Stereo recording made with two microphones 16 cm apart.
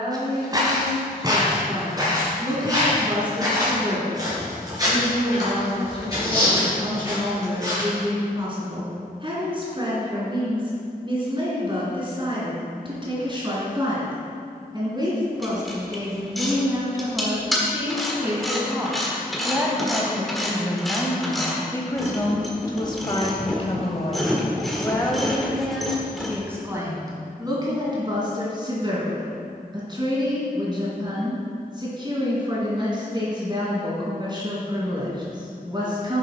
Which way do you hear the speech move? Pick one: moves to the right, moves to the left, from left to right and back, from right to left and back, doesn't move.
from right to left and back.